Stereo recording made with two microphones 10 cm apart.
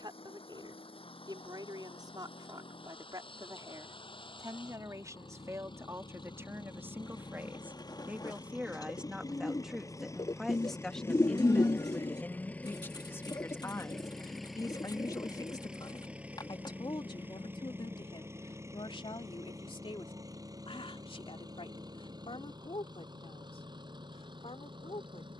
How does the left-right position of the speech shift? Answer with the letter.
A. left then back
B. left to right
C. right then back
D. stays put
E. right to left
E.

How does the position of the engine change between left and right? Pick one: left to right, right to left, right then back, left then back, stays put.
left to right.